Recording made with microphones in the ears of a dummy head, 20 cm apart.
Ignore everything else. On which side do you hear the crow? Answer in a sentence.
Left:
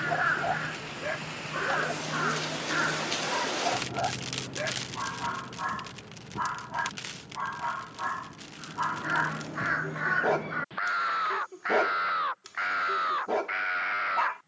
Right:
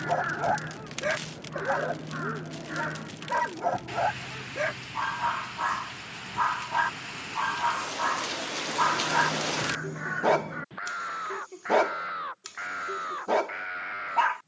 In this clip you hear the crow on the left.